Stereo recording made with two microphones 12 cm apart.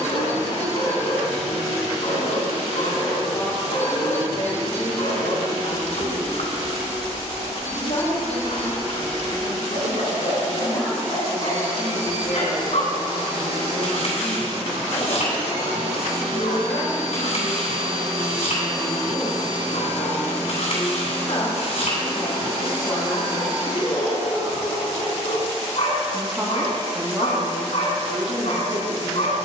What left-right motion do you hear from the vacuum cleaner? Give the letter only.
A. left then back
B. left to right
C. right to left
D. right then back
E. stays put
E.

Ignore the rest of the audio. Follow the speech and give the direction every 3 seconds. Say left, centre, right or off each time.
left, left, left, left, left, left, left, left, centre, right.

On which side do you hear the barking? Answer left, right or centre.
left.